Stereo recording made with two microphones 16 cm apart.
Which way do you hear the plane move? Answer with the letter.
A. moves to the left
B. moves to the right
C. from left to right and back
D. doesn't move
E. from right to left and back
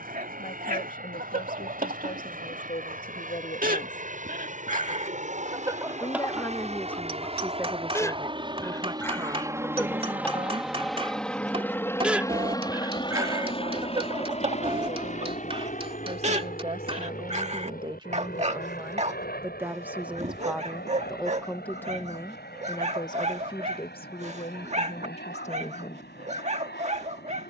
A.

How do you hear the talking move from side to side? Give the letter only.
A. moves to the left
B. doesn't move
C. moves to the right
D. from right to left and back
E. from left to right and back
E.